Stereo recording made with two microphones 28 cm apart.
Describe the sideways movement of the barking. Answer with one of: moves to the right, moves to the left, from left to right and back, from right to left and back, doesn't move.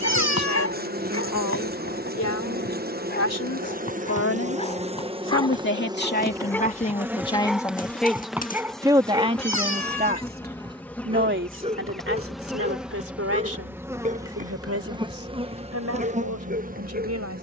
moves to the right.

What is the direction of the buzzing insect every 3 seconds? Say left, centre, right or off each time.
right, right, centre, centre, centre, right.